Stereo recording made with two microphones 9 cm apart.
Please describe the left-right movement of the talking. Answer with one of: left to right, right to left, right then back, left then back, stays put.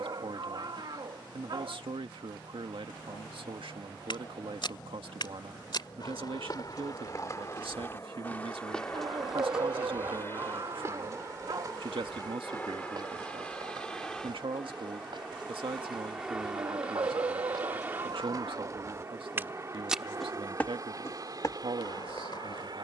stays put.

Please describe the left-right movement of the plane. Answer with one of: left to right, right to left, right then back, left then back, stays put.
left to right.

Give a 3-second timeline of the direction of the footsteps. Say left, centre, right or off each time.
off, left, left, right, right, right, right, left.